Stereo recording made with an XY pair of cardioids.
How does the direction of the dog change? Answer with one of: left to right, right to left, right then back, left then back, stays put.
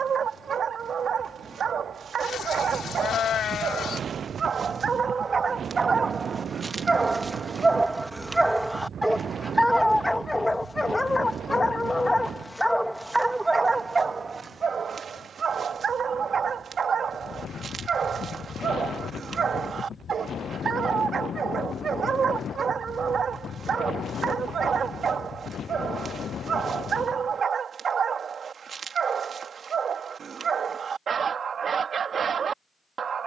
left then back.